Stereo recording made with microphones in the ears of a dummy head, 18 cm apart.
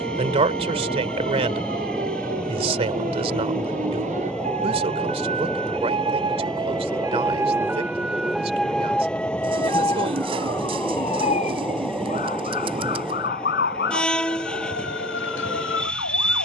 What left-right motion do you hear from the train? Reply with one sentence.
You can hear the train stay in one place.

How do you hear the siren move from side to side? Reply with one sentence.
In this clip you hear the siren travel towards the left.